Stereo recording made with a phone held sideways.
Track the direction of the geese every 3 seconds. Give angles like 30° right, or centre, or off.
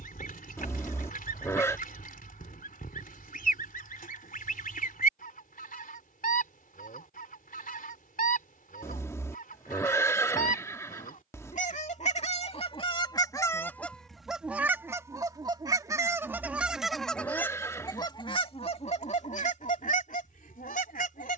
70° left, 70° left, 70° left, 70° left, 20° left, 10° right, 50° left.